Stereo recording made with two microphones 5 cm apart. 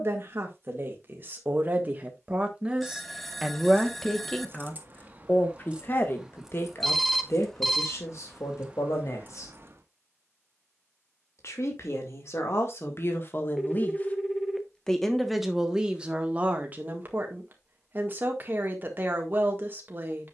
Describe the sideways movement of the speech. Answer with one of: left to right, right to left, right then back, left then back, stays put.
left then back.